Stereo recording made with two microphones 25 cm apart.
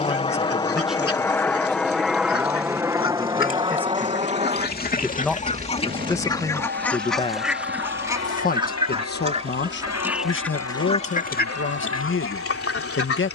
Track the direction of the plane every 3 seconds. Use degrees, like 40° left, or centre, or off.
10° left, 20° right, 40° right, 50° right, 50° right.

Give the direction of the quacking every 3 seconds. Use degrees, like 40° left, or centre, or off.
60° left, 40° left, centre, 10° left, 60° left.